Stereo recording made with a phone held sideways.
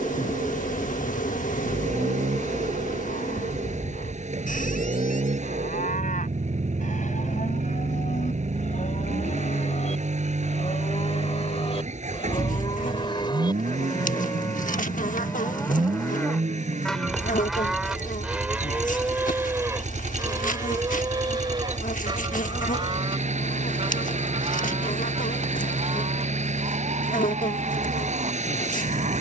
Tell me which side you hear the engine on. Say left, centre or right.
right.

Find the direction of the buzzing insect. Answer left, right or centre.
left.